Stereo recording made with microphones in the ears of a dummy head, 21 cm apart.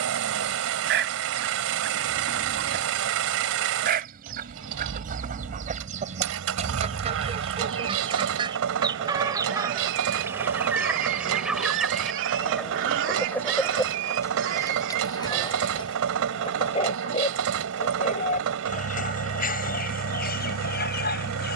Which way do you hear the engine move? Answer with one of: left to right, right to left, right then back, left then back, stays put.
stays put.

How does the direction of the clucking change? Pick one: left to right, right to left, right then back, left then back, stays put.
right to left.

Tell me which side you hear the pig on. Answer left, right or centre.
right.